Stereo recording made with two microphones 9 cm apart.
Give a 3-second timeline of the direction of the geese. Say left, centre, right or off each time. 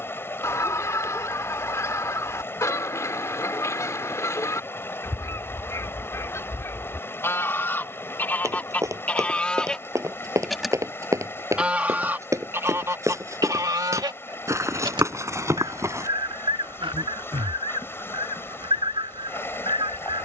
left, left, left, centre, right, right, right.